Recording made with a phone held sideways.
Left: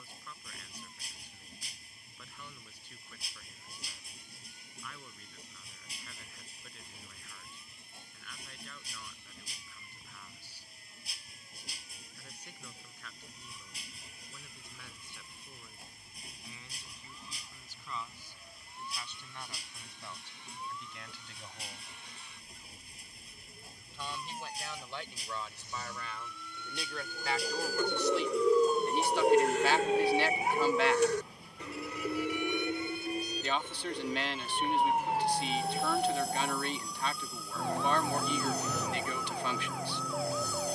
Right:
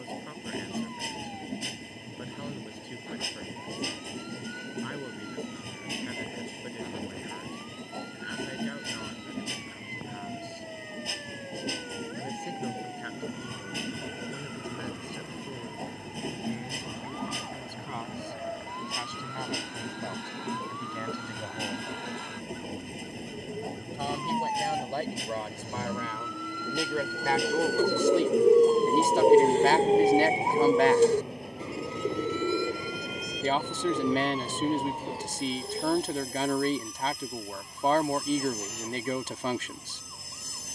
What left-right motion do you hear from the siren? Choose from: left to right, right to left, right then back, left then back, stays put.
right to left.